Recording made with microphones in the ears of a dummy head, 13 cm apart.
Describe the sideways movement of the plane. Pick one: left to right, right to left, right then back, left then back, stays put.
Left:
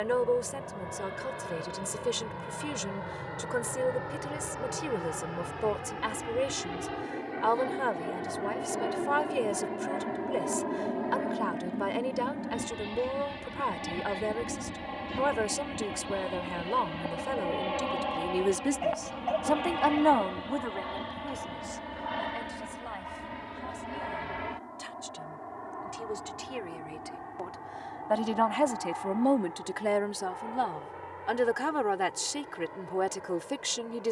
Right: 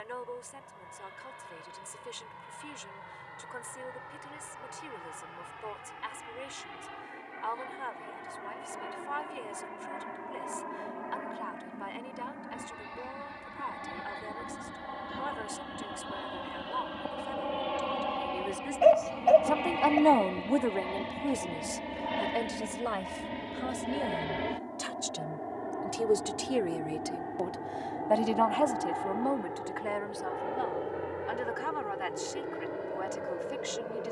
left to right.